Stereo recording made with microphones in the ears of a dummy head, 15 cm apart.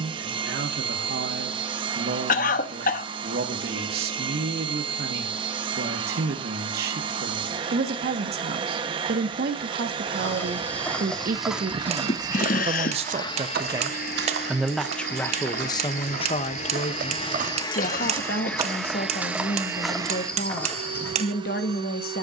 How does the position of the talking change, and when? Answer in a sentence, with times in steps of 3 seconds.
You can hear the talking on the right from 0 s and on the left from 15 s.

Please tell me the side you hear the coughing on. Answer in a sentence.
In this clip you hear the coughing on the left.